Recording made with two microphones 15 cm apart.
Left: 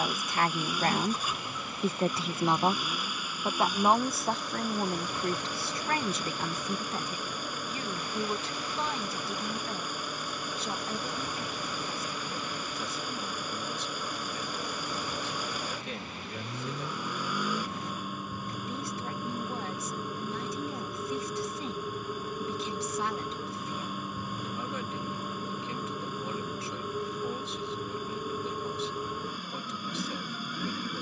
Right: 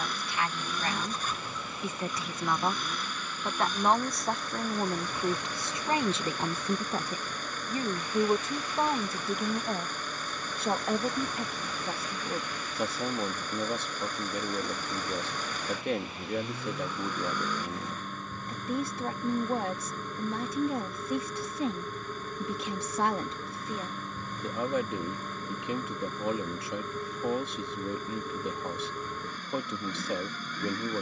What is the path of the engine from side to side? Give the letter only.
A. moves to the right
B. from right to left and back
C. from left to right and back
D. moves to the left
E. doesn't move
E.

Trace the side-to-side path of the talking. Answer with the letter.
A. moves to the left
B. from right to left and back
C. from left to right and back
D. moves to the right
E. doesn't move
D.